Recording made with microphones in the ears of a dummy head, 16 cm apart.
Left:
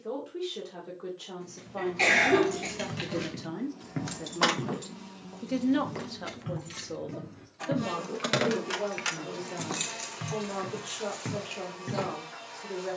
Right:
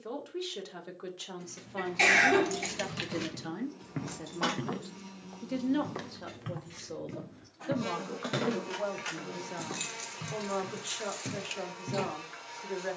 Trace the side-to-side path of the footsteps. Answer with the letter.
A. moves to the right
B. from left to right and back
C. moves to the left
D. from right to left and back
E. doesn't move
B.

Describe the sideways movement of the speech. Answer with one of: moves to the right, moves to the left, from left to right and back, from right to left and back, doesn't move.
from right to left and back.